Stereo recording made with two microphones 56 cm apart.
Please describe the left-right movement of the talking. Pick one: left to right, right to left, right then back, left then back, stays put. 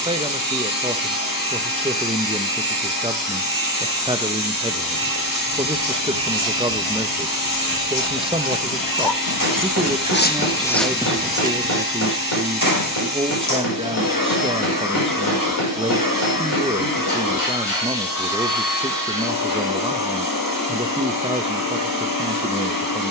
stays put.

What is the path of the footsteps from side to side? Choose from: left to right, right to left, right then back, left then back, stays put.
left to right.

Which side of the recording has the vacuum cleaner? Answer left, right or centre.
left.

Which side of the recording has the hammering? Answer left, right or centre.
left.